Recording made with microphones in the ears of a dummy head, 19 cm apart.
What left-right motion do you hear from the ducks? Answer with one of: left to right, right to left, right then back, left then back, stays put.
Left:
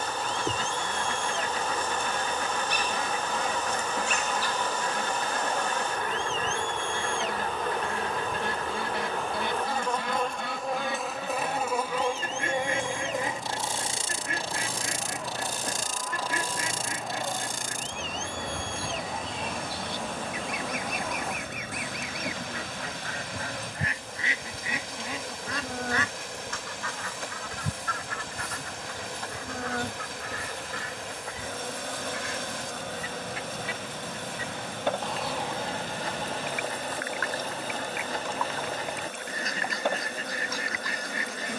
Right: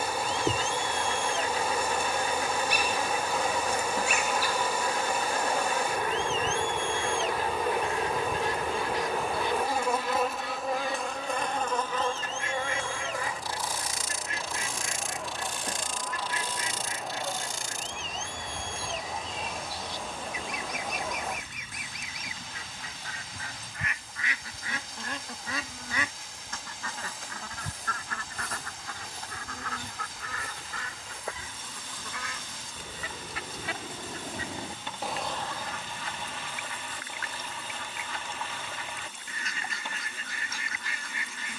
right then back.